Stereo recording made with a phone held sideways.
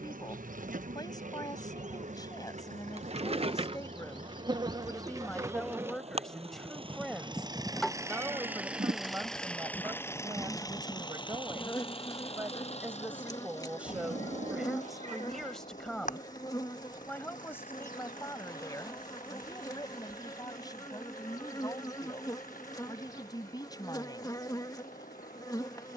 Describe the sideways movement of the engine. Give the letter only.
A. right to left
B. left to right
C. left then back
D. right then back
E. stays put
A.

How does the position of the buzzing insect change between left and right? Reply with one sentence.
In this clip you hear the buzzing insect go from the right side to the left.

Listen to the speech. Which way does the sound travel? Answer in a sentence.
You can hear the speech go right and come back.